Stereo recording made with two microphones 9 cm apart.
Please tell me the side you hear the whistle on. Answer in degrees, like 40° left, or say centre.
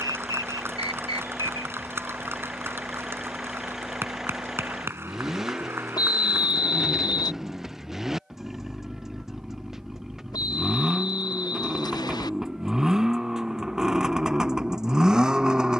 50° left.